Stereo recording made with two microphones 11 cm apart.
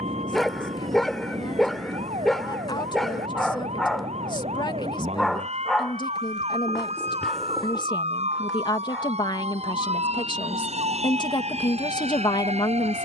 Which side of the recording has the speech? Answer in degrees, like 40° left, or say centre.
40° left.